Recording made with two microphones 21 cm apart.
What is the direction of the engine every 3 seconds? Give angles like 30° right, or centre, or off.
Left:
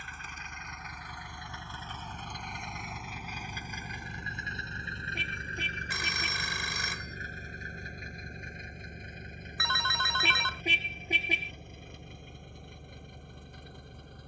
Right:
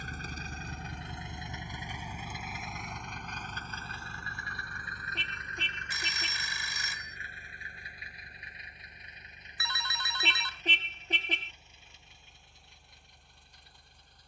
20° right, 20° left, 40° left, 50° left, 60° left.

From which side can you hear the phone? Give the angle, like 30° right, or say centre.
60° left.